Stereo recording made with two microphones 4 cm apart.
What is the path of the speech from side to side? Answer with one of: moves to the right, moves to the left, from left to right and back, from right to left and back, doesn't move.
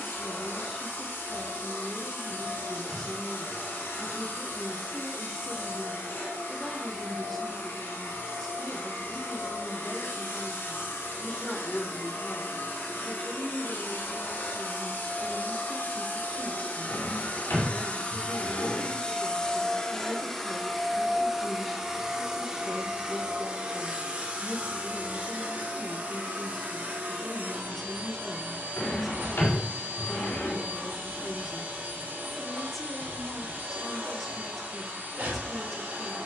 doesn't move.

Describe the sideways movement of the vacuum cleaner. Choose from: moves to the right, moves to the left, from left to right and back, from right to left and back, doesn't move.
moves to the right.